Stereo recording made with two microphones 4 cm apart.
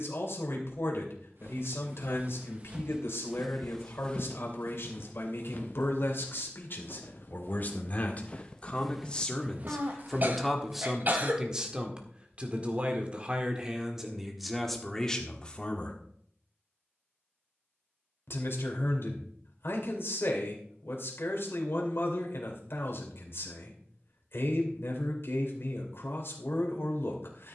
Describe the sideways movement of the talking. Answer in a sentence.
You can hear the talking move from left to right and back again.